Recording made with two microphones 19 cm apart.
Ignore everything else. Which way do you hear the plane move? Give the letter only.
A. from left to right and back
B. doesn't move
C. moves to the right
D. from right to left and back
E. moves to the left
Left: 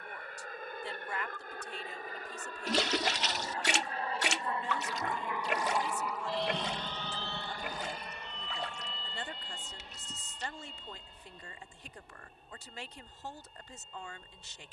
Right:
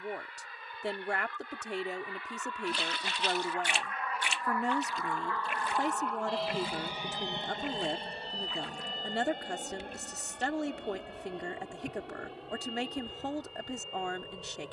C.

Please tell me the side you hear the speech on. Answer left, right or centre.
right.